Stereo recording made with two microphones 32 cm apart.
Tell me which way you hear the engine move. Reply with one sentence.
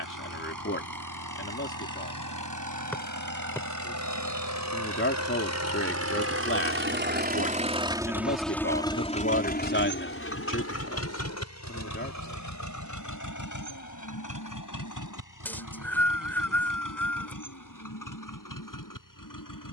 In this clip you hear the engine travel towards the left.